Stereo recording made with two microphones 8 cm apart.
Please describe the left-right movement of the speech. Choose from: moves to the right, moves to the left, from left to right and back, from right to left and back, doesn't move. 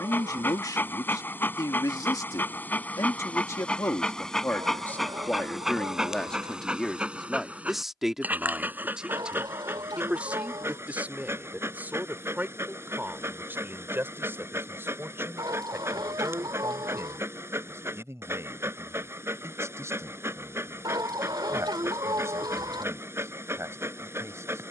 moves to the right.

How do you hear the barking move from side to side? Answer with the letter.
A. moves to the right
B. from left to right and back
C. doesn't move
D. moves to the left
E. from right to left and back
A.